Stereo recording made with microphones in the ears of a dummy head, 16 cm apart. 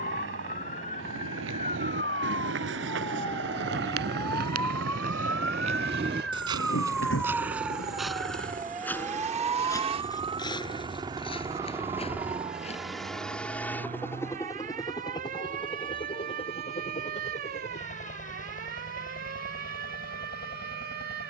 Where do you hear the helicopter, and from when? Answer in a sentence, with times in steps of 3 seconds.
You can hear the helicopter on the right from 0 s, in the centre from 12 s and on the left from 15 s.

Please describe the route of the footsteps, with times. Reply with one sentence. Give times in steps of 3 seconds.
You can hear the footsteps on the right from 0 s, in the centre from 6 s, on the left from 9 s and not at all from 15 s.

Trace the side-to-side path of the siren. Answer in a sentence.
You can hear the siren move to the right.